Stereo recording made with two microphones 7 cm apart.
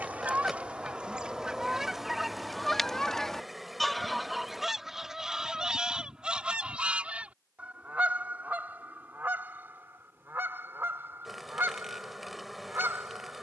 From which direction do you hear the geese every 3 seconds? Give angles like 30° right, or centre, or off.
10° right, centre, 20° right, 30° right, 30° right.